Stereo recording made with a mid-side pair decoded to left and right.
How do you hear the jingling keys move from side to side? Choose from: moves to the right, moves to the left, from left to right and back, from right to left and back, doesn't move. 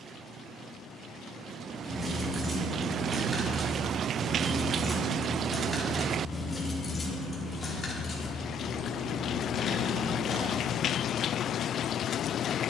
moves to the left.